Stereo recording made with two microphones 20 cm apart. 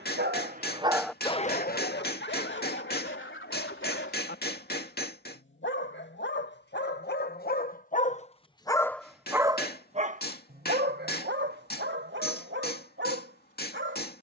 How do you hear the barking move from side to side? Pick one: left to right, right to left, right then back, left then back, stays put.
left then back.